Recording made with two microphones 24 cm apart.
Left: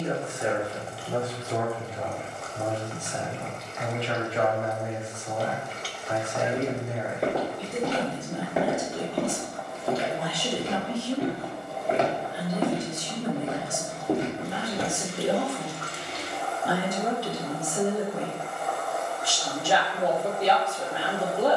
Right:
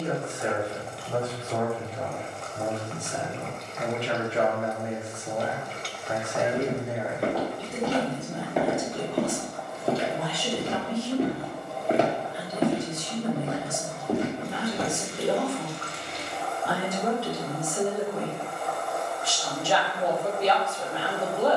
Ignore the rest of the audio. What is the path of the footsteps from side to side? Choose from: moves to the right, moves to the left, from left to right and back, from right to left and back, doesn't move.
from left to right and back.